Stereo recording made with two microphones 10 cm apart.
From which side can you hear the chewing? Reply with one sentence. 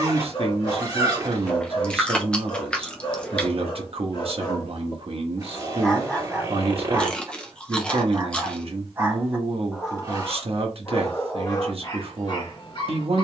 In this clip you hear the chewing in the centre.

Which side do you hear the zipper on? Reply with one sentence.
You can hear the zipper on the right.